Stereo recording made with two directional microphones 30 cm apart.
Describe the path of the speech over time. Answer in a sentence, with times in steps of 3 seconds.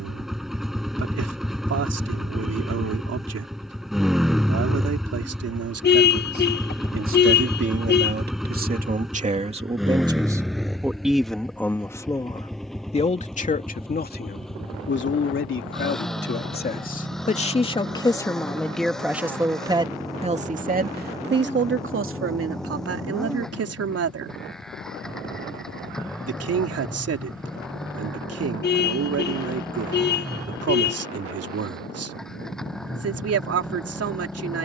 You can hear the speech on the right from 0 s, in the centre from 9 s, on the left from 12 s, in the centre from 18 s and on the right from 21 s.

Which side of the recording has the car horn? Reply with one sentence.
In this clip you hear the car horn on the left.